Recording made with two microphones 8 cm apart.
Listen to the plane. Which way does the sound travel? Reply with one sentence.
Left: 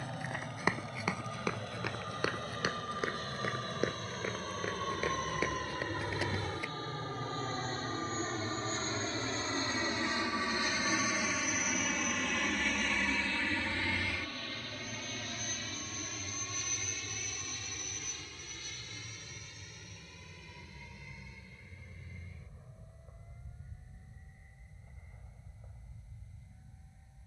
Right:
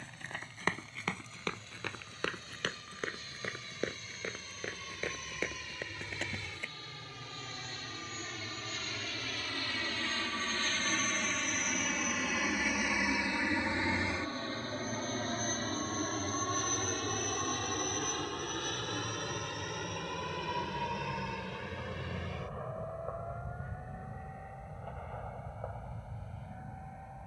In this clip you hear the plane move to the right.